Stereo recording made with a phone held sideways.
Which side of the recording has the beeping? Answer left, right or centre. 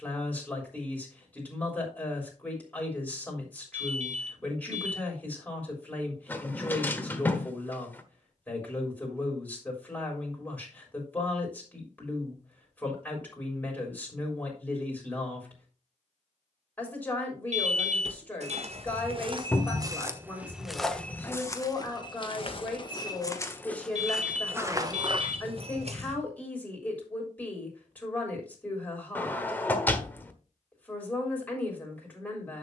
right.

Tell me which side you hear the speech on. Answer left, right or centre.
centre.